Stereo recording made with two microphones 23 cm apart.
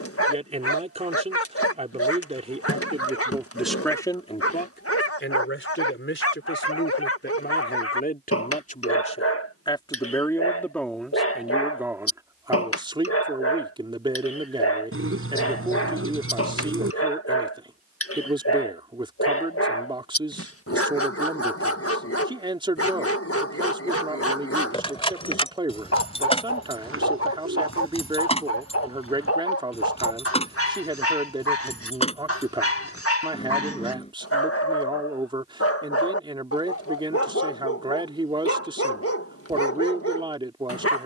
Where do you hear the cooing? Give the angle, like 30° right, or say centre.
70° right.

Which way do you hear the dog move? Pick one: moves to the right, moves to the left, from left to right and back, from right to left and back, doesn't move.
doesn't move.